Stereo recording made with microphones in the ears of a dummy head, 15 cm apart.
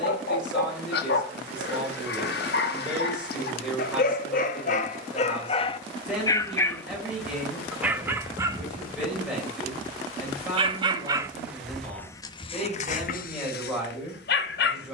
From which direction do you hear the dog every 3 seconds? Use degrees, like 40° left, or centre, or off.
70° left, 50° left, centre, 20° right, 50° left.